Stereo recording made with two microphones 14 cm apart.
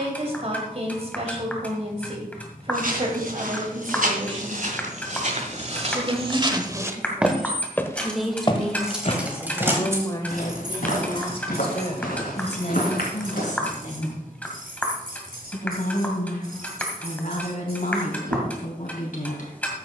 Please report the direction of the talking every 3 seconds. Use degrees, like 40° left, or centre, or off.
40° right, 40° right, 10° right, 30° left, 50° left, 60° left, 60° left.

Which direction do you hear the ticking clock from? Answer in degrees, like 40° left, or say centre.
10° left.